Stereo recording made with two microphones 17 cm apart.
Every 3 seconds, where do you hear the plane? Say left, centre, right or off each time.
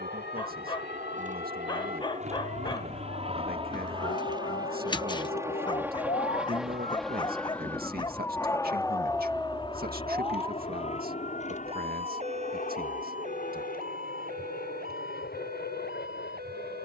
right, right, centre, left, left, left.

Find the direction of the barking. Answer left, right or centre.
left.